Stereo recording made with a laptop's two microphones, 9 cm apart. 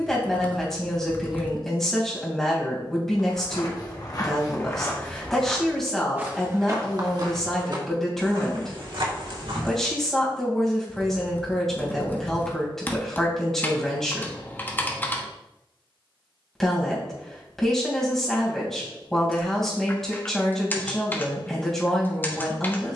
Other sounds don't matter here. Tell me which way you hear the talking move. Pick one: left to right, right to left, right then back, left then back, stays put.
stays put.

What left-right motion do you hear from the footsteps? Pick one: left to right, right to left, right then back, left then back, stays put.
left to right.